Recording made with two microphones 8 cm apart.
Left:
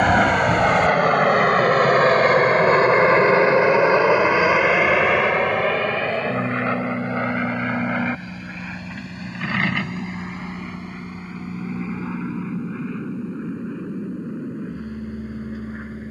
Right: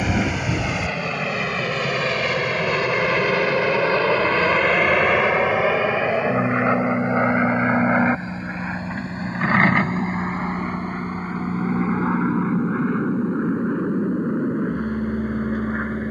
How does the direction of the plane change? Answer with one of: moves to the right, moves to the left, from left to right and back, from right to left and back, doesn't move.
moves to the right.